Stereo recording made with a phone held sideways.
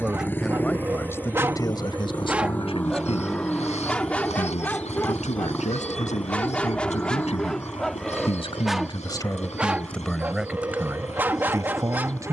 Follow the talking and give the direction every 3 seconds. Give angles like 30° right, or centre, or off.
30° left, 70° left, 60° left, centre.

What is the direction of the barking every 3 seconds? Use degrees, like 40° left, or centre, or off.
20° right, 10° left, centre, 10° right.